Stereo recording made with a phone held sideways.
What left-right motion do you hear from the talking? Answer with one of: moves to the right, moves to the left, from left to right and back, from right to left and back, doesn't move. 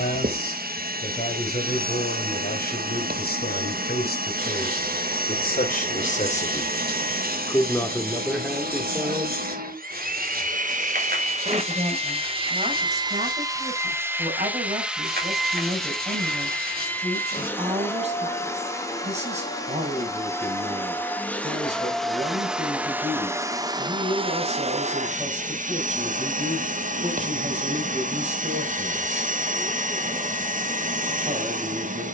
moves to the right.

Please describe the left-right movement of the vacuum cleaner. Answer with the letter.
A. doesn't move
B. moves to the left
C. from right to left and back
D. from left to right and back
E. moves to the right
C.